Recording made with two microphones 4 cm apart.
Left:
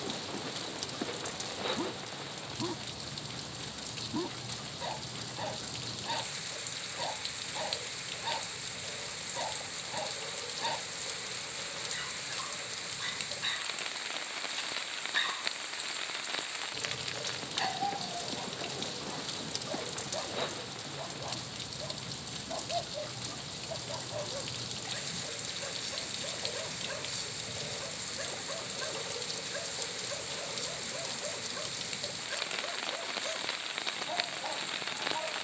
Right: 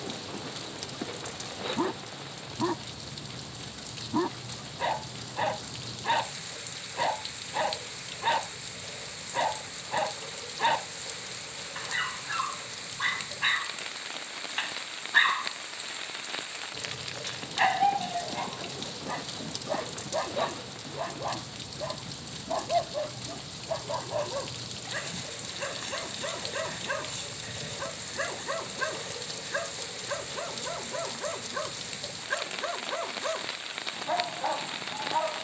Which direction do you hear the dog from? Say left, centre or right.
right.